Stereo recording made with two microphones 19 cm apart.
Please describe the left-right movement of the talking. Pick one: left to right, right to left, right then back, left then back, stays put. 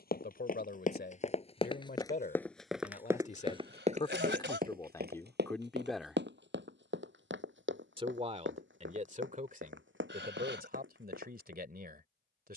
left to right.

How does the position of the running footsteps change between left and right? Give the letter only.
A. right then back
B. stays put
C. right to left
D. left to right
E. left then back
D.